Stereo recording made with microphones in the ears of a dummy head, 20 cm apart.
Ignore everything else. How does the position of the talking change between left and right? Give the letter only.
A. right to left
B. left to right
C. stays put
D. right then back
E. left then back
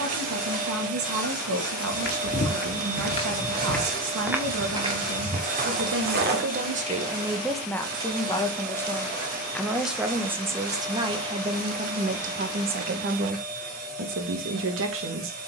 E.